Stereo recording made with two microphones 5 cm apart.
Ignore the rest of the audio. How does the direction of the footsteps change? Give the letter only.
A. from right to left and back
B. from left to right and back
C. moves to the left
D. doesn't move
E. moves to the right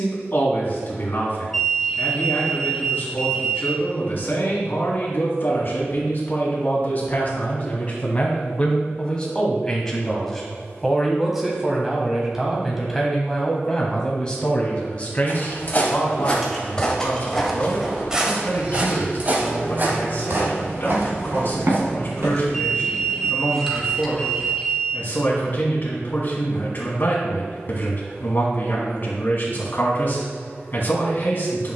E.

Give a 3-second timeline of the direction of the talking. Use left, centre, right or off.
left, left, left, centre, centre, left, left, left, left, left, left.